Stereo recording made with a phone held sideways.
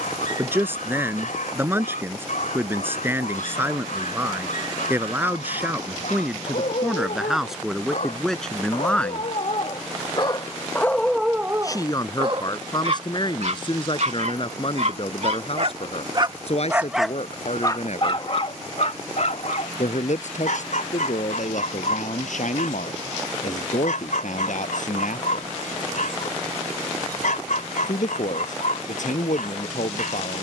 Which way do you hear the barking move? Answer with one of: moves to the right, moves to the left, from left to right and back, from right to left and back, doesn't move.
from left to right and back.